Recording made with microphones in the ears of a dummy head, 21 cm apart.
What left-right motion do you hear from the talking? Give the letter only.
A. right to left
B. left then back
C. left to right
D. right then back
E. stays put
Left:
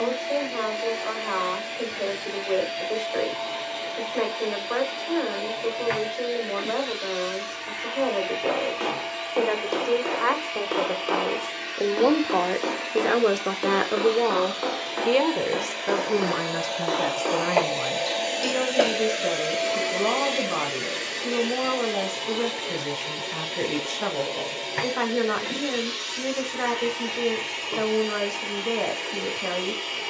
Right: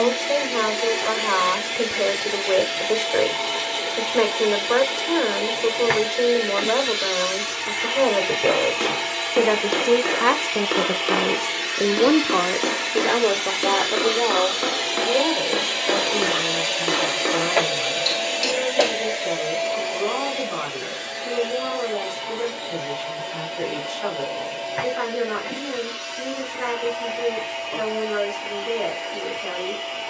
A.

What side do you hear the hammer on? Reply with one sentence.
You can hear the hammer on the right.